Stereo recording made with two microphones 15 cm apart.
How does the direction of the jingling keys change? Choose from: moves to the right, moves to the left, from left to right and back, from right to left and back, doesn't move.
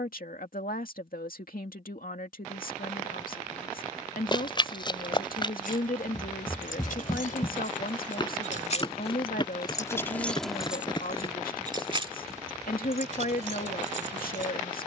moves to the right.